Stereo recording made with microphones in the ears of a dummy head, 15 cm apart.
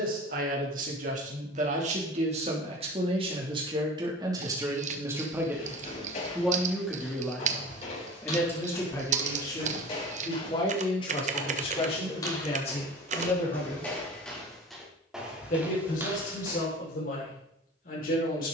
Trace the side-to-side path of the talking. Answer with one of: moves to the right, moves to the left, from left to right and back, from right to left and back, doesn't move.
moves to the left.